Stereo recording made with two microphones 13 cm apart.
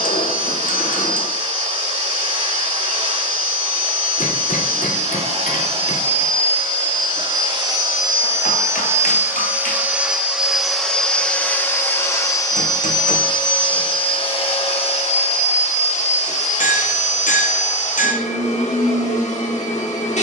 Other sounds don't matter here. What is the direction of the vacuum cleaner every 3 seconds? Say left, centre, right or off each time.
right, right, right, centre, left, left, left.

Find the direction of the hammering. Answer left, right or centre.
left.